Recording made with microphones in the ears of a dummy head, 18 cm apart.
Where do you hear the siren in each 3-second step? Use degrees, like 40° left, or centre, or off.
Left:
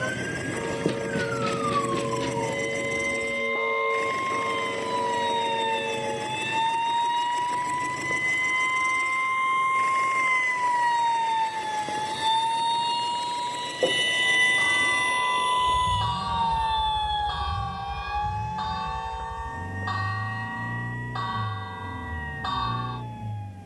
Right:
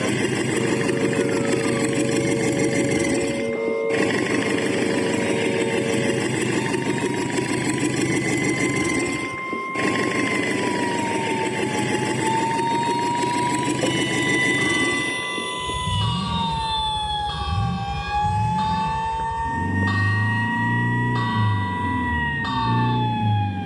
80° left, 80° left, 70° left, 60° left, 20° left, 40° right, 70° right, 80° right.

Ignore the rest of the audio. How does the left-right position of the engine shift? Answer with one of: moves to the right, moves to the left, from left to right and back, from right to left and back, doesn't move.
doesn't move.